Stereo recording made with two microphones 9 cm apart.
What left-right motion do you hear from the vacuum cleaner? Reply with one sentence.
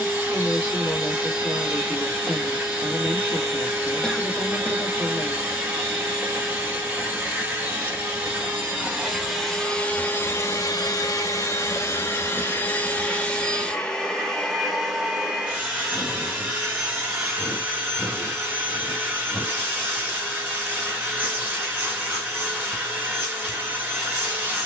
You can hear the vacuum cleaner move from right to left and back again.